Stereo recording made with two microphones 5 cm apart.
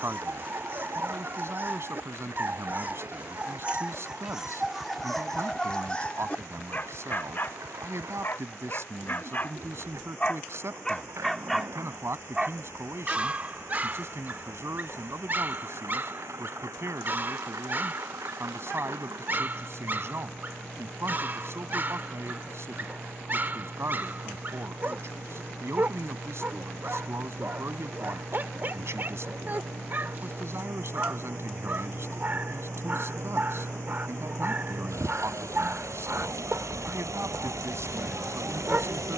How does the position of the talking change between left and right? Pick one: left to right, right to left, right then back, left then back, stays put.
stays put.